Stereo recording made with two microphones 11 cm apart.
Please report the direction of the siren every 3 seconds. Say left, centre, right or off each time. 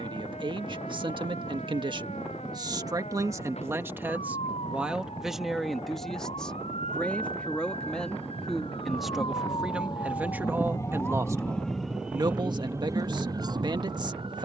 left, left, left, left, right.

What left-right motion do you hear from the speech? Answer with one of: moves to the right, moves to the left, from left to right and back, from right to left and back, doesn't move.
from right to left and back.